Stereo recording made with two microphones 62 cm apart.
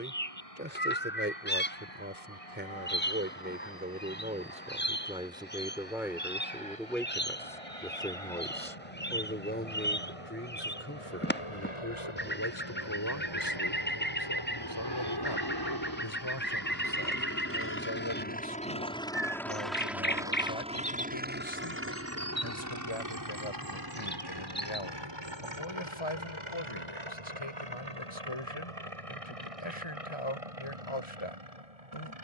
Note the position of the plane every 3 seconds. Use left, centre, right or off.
left, left, left, left, left, left, centre, right, right, right, right.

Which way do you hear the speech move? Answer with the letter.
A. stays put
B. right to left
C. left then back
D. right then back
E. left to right
B.